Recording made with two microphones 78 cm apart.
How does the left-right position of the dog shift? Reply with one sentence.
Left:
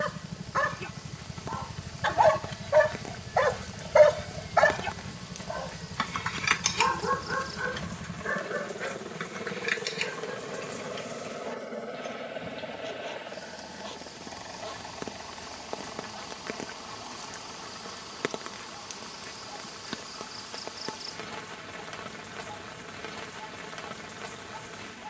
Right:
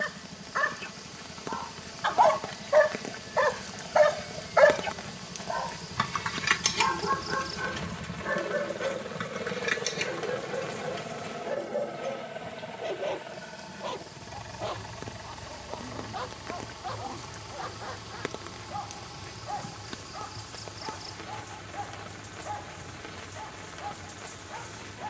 In this clip you hear the dog travel towards the right.